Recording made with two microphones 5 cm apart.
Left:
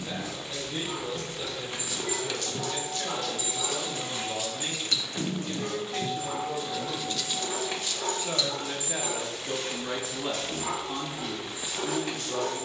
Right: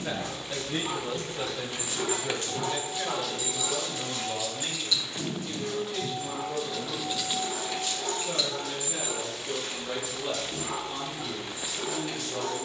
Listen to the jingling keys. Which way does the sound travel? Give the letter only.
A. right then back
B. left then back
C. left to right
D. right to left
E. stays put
B.